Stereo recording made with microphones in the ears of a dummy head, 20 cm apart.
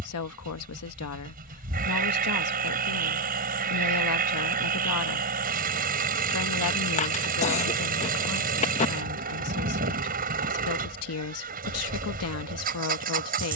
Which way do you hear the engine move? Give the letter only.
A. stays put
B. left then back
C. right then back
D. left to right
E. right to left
A.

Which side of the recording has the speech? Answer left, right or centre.
left.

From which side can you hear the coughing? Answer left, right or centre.
left.